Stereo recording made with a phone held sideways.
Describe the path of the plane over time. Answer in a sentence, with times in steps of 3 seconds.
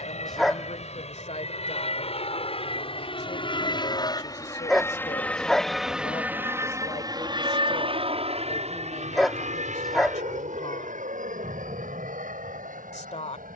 In this clip you hear the plane on the left from 0 s and on the right from 6 s.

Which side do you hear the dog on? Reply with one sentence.
In this clip you hear the dog in the centre.